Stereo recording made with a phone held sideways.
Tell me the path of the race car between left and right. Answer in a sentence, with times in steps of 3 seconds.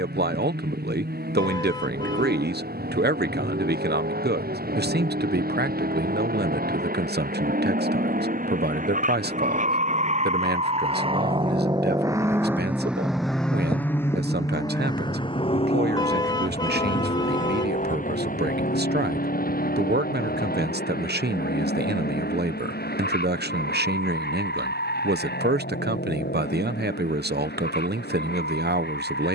In this clip you hear the race car on the right from 0 s, in the centre from 12 s and on the left from 15 s.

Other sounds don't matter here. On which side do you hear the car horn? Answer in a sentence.
In this clip you hear the car horn on the left.